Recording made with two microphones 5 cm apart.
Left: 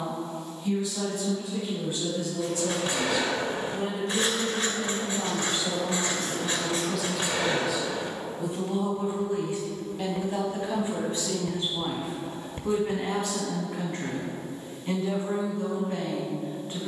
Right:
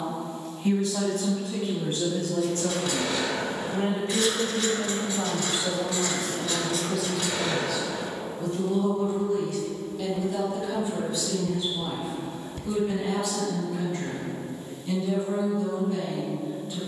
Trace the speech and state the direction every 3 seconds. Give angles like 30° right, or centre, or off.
50° right, 30° right, centre, 30° left, 40° left, 40° left.